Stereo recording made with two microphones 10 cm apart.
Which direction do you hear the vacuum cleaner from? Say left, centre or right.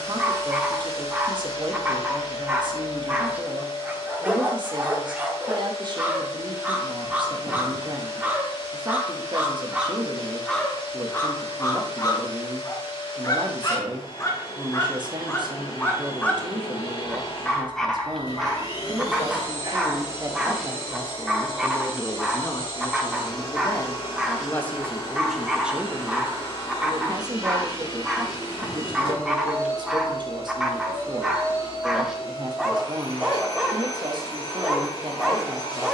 left.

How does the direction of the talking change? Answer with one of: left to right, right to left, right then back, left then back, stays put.
left then back.